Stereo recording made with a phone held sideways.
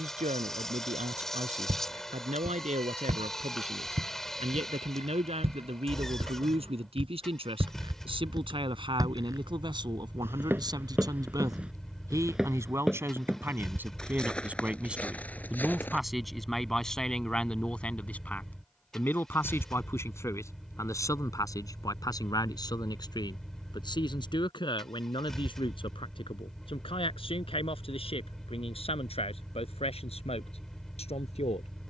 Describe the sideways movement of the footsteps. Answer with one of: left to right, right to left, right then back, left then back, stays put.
right to left.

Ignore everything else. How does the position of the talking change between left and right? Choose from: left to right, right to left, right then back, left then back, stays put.
right to left.